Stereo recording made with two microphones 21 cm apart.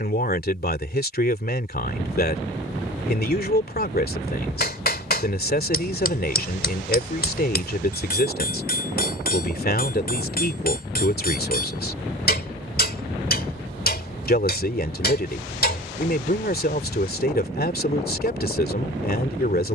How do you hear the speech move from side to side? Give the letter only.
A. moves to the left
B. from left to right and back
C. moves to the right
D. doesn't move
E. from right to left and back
D.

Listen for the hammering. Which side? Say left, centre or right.
left.